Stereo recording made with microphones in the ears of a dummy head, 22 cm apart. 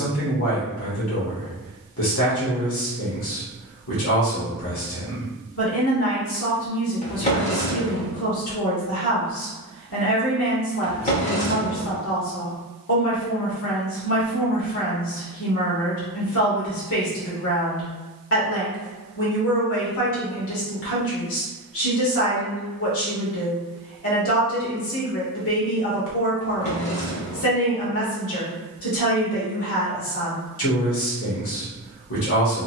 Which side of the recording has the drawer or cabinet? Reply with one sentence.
In this clip you hear the drawer or cabinet on the left.